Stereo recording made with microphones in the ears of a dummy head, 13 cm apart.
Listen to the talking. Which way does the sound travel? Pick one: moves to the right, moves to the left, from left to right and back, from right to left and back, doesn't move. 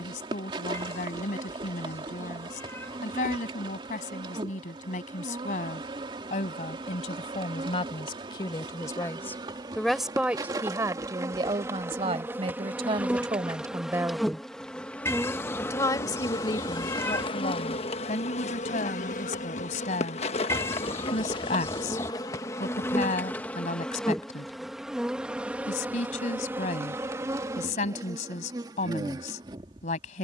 from left to right and back.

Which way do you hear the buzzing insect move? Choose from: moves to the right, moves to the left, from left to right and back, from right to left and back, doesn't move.
from right to left and back.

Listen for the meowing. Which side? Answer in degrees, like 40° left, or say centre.
20° left.